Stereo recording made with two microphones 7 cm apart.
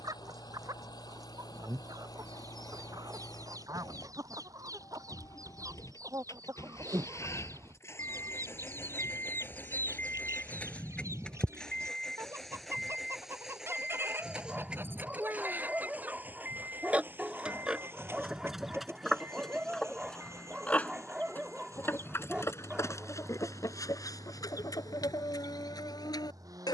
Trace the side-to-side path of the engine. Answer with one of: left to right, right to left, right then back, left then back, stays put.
left to right.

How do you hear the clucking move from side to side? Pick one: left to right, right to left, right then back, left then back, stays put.
right to left.